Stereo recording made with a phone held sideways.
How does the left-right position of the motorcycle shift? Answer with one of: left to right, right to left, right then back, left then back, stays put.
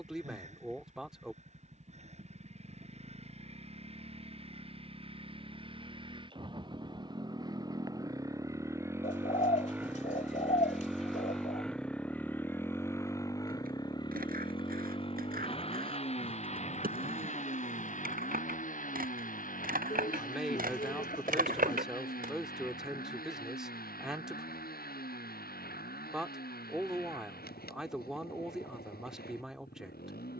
right to left.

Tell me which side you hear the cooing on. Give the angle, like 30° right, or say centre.
50° left.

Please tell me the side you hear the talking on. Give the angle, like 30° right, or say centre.
centre.